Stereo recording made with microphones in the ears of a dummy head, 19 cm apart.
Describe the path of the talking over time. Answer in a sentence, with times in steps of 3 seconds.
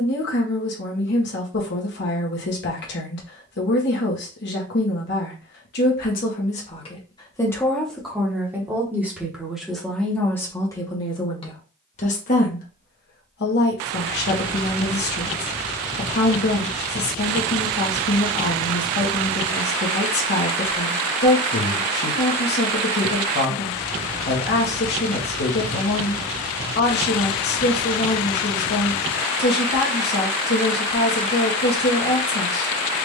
You can hear the talking on the left from 0 s, in the centre from 6 s and on the left from 12 s.